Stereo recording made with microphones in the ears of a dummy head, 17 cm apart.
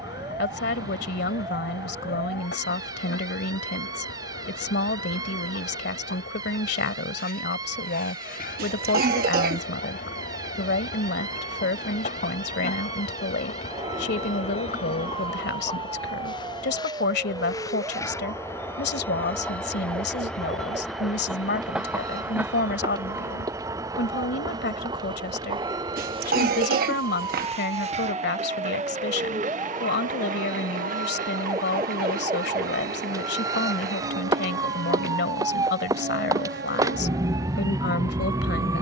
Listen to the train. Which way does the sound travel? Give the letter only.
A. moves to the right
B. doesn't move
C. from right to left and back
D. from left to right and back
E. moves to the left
A.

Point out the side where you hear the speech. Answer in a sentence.
In this clip you hear the speech on the left.